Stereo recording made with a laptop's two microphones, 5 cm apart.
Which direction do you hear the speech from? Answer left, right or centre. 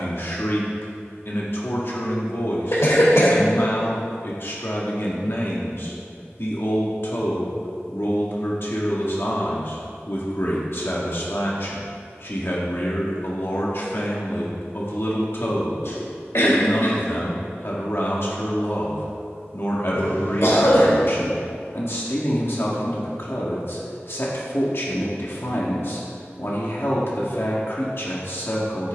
left.